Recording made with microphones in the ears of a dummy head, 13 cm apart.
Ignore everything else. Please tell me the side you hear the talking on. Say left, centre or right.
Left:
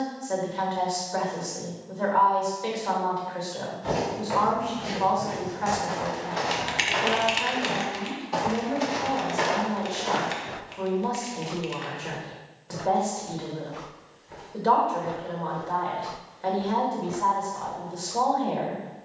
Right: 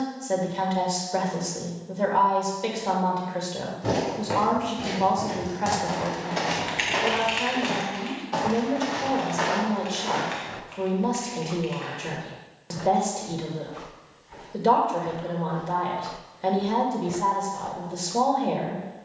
right.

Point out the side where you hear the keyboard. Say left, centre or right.
left.